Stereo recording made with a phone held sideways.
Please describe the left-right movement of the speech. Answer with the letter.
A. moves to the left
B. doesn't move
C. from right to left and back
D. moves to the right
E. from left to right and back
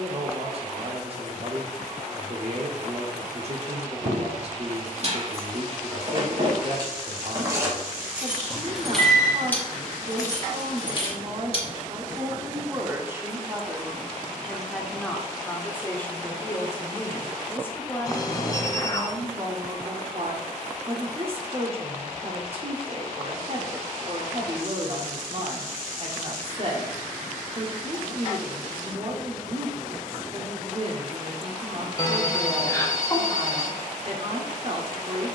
C.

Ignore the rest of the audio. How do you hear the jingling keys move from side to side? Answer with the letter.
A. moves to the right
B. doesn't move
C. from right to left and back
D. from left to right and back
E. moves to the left
E.